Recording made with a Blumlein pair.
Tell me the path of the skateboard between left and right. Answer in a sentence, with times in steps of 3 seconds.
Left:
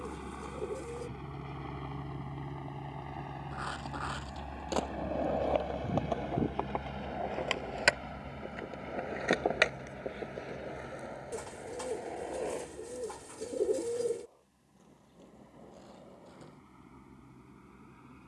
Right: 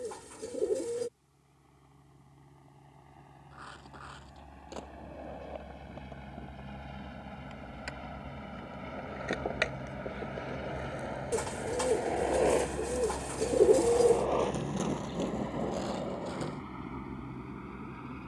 You can hear the skateboard not at all from 0 s, on the left from 3 s, in the centre from 9 s and on the right from 12 s.